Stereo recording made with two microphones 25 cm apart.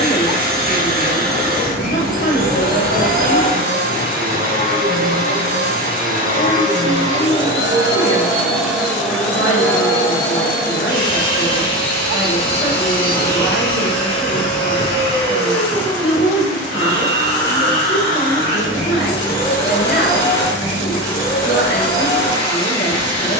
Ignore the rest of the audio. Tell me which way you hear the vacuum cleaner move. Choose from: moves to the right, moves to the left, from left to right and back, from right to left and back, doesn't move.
moves to the left.